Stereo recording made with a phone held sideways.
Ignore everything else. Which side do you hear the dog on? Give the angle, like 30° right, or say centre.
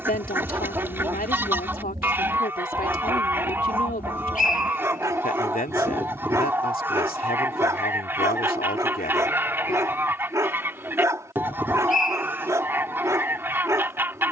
20° right.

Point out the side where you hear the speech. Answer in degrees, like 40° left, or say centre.
60° left.